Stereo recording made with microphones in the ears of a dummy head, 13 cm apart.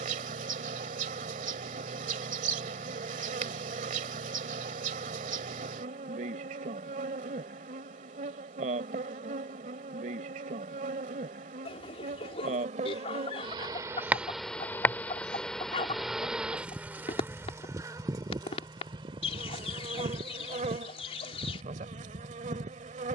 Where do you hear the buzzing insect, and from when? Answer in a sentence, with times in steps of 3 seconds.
You can hear the buzzing insect on the right from 0 s, in the centre from 15 s and on the right from 18 s.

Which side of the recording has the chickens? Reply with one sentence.
You can hear the chickens on the left.